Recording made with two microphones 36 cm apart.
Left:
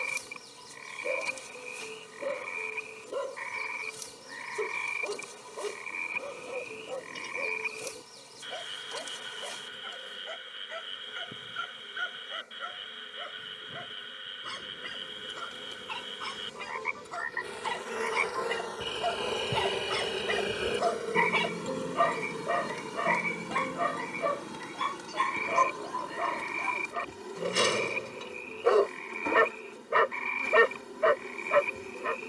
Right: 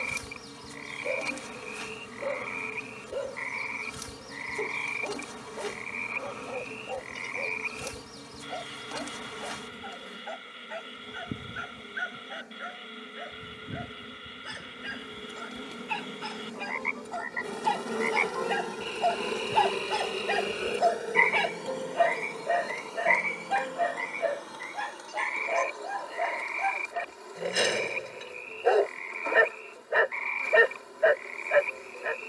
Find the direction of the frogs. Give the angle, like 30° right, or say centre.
20° left.